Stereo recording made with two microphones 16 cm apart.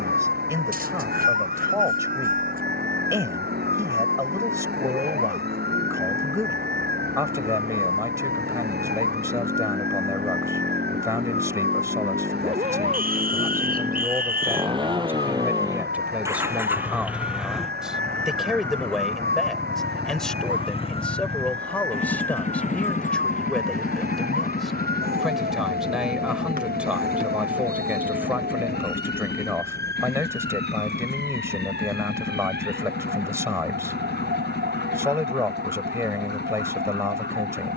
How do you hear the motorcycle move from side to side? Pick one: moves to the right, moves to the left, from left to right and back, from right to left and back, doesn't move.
moves to the left.